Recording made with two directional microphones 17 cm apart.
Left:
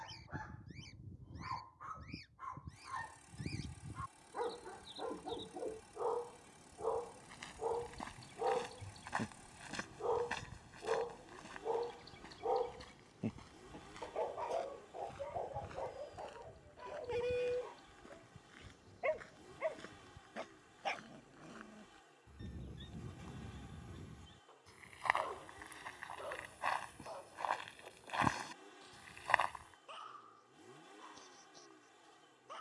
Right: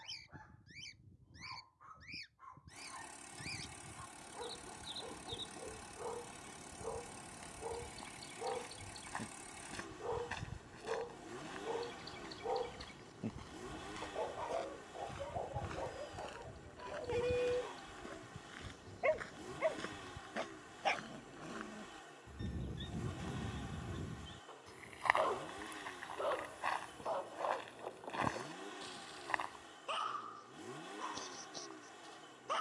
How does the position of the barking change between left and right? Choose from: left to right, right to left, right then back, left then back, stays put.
left to right.